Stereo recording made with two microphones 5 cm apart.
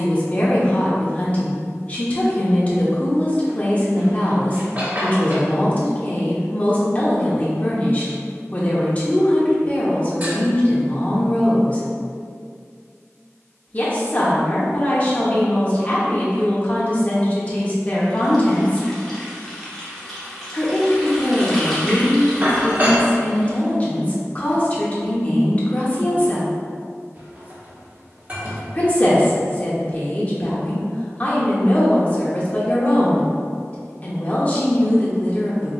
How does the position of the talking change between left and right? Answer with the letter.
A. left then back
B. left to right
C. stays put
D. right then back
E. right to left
C.